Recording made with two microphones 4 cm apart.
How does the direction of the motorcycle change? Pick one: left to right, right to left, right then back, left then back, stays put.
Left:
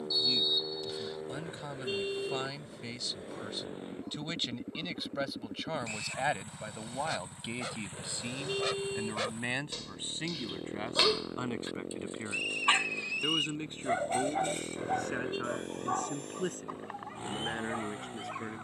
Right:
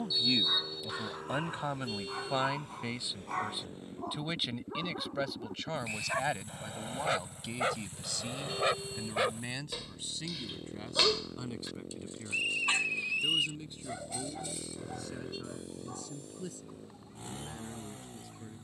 stays put.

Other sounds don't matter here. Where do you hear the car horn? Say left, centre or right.
left.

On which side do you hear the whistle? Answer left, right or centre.
centre.